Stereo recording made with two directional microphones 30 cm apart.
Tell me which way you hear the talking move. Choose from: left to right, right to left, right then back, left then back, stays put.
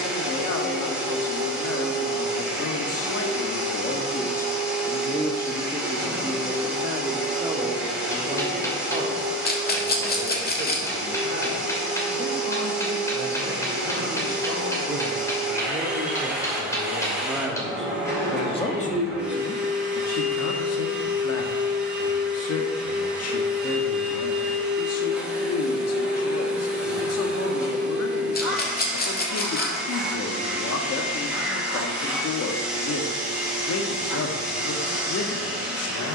right then back.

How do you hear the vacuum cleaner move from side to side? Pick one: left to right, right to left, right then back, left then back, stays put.
stays put.